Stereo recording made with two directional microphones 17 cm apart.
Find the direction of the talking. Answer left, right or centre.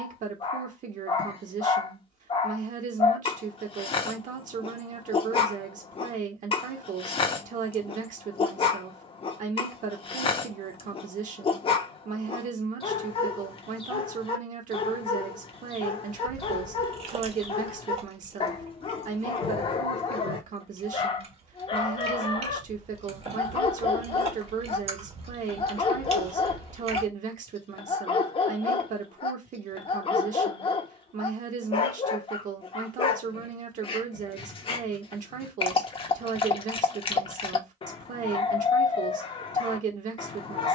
right.